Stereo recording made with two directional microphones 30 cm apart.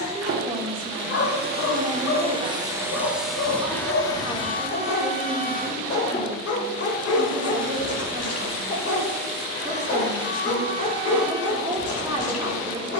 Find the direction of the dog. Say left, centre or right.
left.